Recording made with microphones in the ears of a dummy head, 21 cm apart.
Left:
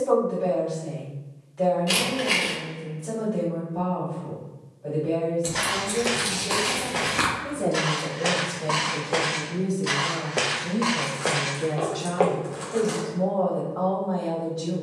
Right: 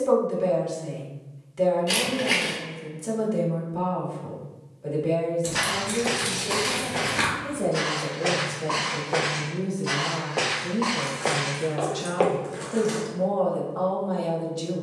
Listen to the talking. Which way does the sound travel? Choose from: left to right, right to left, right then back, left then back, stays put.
left then back.